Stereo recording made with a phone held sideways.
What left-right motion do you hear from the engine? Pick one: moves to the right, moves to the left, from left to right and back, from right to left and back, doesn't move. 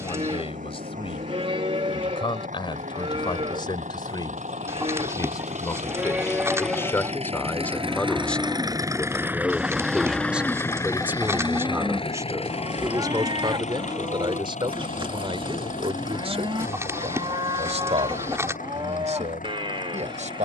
moves to the left.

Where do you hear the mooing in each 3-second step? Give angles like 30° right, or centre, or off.
50° right, 40° right, centre, 20° right, 40° right, 40° right, 40° right.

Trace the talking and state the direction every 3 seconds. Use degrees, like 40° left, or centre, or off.
40° left, 30° left, 10° left, 10° right, 30° right, 50° right, 60° right.